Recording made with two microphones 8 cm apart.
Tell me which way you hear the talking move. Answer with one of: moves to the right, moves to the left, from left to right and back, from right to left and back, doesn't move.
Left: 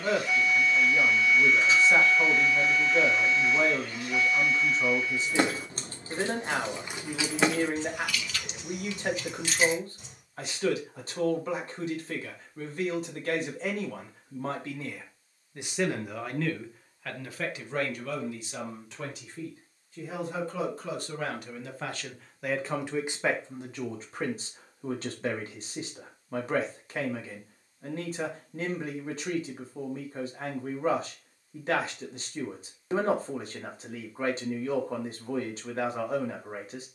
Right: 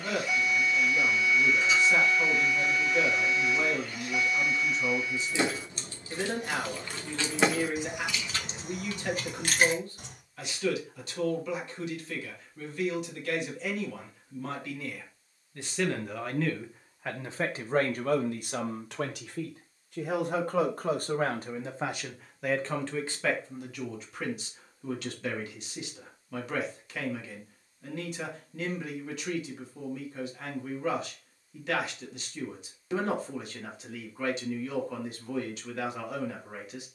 from left to right and back.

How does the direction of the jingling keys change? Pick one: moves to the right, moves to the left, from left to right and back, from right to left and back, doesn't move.
moves to the right.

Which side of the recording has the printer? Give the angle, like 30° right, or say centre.
30° left.